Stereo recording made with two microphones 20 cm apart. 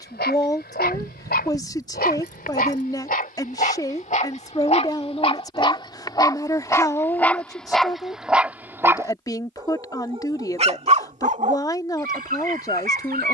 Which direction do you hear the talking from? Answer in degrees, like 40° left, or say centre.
20° left.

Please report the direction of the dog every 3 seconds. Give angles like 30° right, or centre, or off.
50° left, 30° left, centre, 30° right, 50° right.